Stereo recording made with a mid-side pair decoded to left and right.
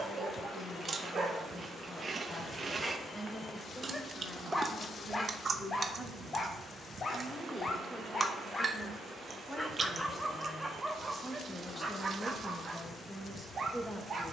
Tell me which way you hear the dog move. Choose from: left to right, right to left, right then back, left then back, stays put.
left then back.